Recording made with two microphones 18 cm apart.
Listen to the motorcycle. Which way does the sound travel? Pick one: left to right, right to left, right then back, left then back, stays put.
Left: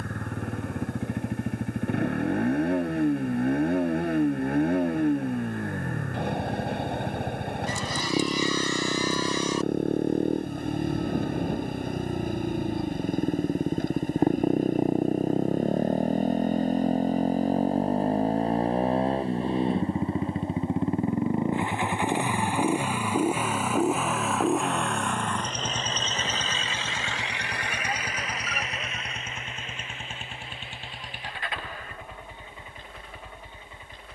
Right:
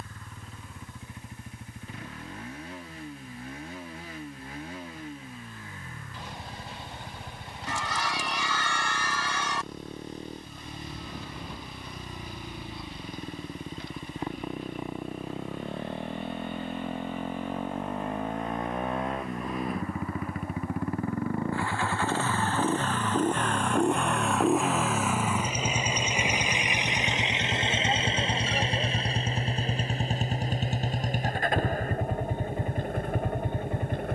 left to right.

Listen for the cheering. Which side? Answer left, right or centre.
right.